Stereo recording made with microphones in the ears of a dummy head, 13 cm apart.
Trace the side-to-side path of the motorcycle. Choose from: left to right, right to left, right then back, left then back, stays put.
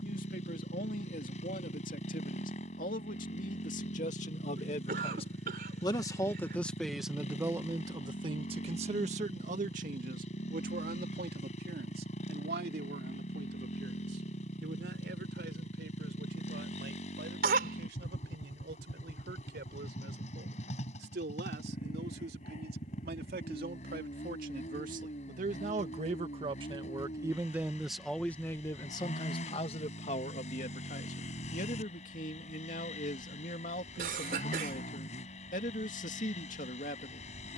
stays put.